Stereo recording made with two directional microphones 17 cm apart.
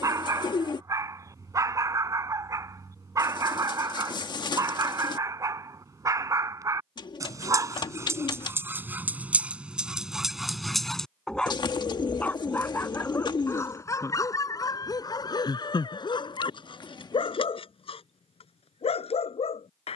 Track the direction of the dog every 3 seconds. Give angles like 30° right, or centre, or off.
20° right, 20° right, 20° right, centre, 20° left, 30° left, 40° left.